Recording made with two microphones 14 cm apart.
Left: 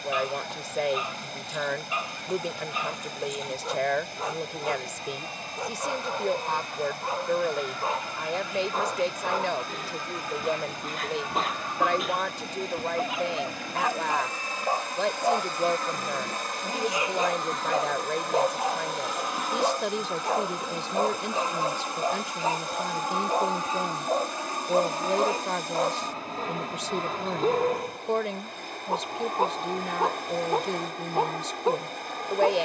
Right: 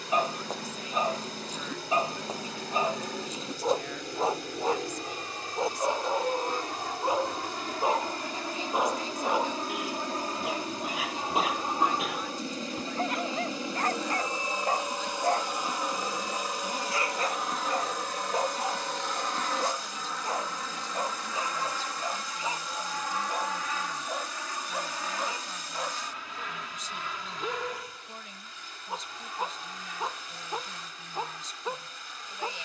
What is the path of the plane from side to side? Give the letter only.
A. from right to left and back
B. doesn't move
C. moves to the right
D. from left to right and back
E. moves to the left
E.